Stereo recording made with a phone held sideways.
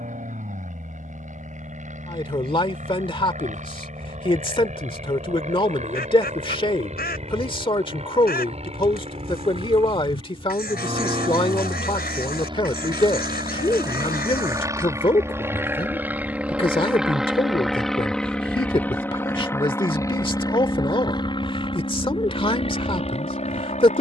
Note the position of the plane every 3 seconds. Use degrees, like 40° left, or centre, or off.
60° right, 50° right, 50° right, 40° right, 30° right, 10° right, 20° left, 40° left.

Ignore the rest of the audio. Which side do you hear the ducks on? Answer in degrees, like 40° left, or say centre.
90° left.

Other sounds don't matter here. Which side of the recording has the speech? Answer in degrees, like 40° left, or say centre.
30° left.